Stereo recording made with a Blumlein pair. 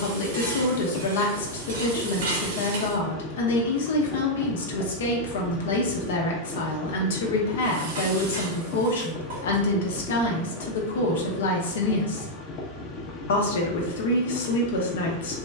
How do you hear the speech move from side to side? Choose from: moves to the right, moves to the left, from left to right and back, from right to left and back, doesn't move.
doesn't move.